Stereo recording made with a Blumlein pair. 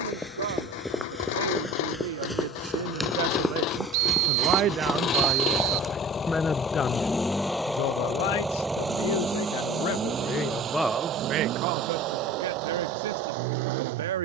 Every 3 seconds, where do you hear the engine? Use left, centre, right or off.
left, left, centre, right, right.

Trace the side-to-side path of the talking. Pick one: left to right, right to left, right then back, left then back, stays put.
left then back.